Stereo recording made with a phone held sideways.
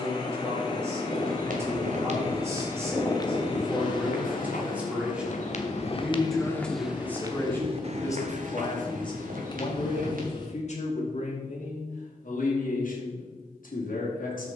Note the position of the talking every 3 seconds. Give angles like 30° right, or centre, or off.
20° right, 10° right, 20° left, 50° left, 70° left.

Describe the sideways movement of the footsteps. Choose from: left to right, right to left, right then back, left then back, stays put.
left then back.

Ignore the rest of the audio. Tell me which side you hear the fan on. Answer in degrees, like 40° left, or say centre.
30° left.